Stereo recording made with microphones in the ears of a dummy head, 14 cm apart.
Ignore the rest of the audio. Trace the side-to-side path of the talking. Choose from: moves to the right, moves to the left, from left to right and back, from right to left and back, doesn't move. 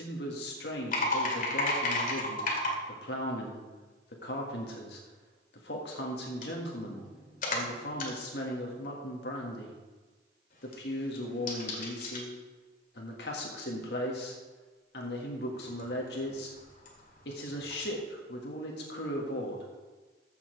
doesn't move.